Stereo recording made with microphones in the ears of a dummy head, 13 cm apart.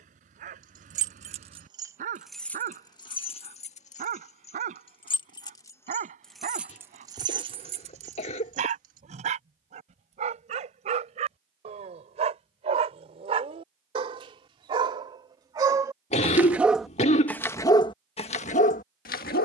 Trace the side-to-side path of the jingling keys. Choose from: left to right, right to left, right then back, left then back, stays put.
left then back.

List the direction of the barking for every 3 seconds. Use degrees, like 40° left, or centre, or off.
60° right, 60° right, 50° right, 50° right, 40° right, centre, 60° left.